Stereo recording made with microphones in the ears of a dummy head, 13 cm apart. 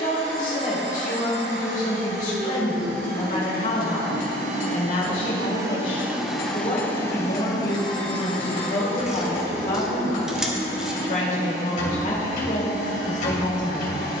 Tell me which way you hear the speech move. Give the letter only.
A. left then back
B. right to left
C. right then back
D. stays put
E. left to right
D.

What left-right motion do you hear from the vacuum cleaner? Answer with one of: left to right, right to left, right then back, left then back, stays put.
right to left.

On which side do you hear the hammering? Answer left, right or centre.
left.